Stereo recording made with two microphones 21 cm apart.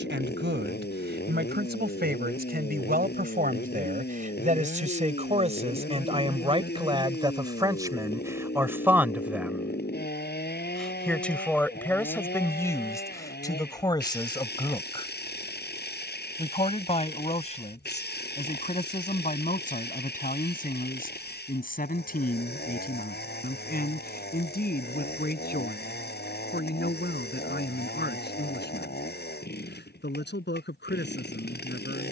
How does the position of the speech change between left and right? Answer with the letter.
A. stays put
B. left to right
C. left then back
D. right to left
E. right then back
D.